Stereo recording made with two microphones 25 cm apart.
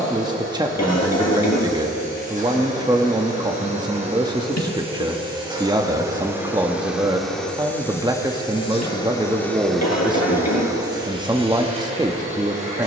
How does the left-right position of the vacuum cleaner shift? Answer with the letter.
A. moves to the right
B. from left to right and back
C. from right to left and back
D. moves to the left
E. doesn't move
C.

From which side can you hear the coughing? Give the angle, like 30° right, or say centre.
80° left.